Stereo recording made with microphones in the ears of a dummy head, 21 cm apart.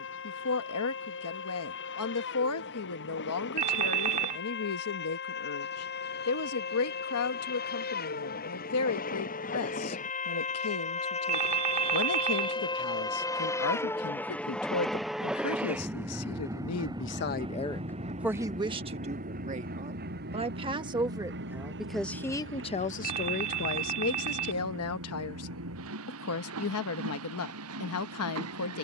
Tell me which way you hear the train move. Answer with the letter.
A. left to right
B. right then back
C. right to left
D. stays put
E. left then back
A.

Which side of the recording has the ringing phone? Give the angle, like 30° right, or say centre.
30° right.